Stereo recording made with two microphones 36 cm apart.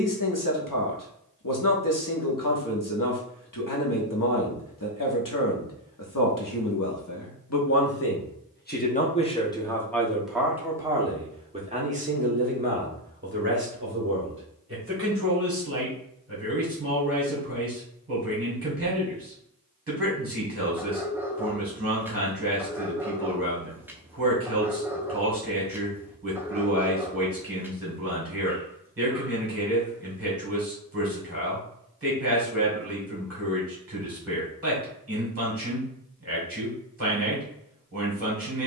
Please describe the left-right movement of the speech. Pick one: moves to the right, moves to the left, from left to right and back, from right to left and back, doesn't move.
moves to the right.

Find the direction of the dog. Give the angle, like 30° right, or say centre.
10° right.